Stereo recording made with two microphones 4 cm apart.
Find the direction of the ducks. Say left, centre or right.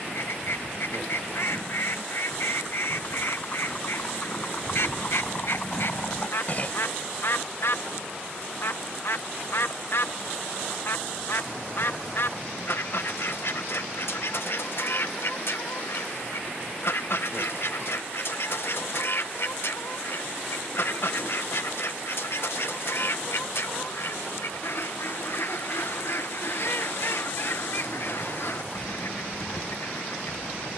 left.